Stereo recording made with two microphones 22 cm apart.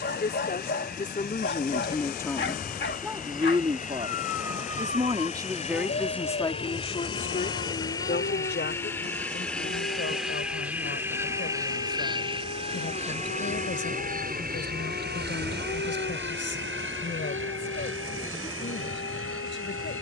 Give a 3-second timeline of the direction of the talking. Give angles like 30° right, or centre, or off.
30° left, 20° right, 30° left, 60° left, 60° left, 60° left, 60° left.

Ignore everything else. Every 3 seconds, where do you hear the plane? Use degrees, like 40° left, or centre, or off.
40° left, 40° left, 20° left, centre, 30° right, 50° right, 60° right.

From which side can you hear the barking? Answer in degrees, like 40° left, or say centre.
50° left.